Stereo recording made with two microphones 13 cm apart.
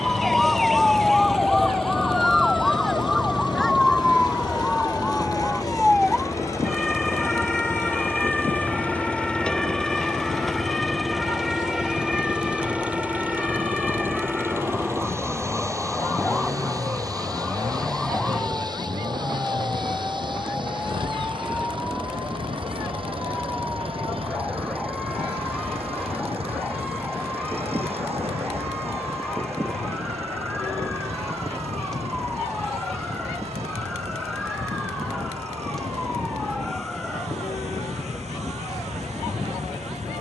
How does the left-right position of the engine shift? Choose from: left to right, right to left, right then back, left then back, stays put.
left to right.